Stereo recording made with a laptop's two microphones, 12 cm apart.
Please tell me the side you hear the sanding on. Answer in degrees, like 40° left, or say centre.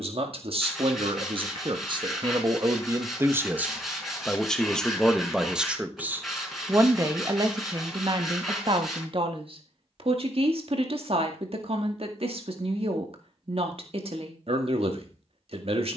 centre.